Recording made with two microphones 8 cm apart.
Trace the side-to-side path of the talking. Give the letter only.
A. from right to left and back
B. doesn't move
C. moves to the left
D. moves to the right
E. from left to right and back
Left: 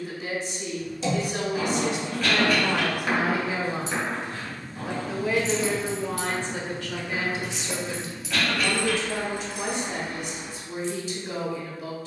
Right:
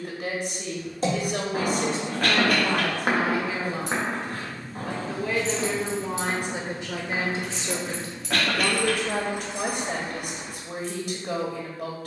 A.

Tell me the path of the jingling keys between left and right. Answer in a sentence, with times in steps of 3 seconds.
You can hear the jingling keys not at all from 0 s, on the right from 3 s, in the centre from 6 s and on the right from 9 s.